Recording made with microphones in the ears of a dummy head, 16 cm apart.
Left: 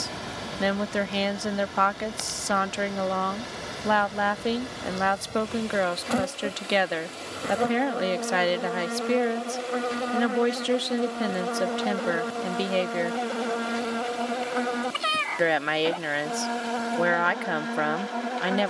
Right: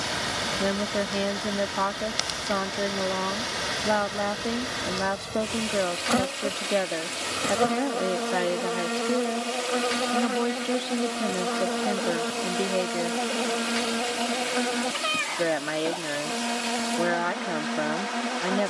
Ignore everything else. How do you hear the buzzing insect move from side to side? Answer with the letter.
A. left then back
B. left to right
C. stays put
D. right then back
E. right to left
E.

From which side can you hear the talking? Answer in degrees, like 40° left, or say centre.
50° left.